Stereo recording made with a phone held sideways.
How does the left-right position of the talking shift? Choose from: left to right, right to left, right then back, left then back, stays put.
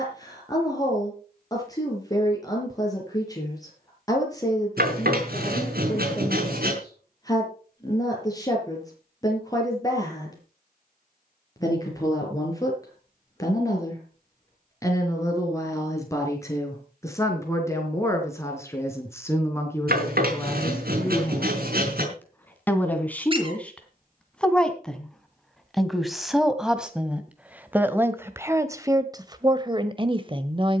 left to right.